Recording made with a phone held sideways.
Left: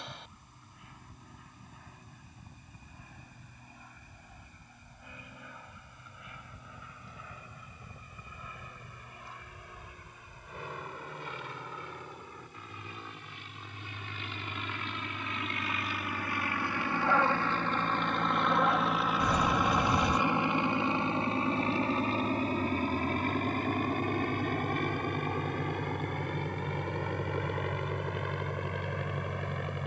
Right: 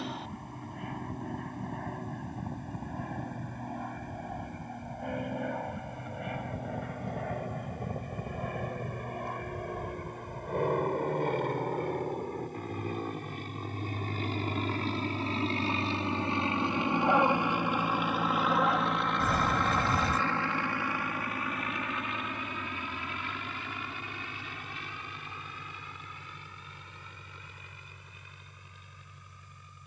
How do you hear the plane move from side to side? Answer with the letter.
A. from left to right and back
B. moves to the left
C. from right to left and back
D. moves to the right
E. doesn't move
B.